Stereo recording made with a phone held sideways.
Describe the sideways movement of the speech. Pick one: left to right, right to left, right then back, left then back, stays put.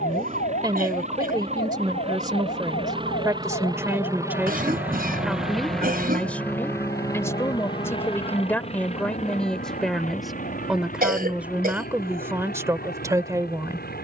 left then back.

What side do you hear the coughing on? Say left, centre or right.
right.